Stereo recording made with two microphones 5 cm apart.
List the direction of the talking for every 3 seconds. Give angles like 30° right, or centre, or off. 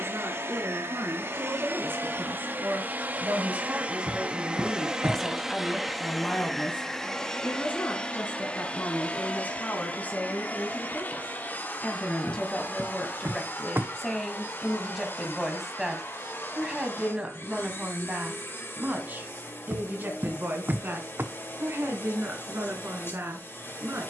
50° right, 10° right, 40° left, 30° left, 10° left, 20° right, 40° right, 50° right.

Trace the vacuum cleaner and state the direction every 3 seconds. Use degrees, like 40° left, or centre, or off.
50° right, 20° right, 20° left, 40° left, 50° left, 50° left, 60° left, 60° left.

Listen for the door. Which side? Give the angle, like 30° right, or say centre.
50° right.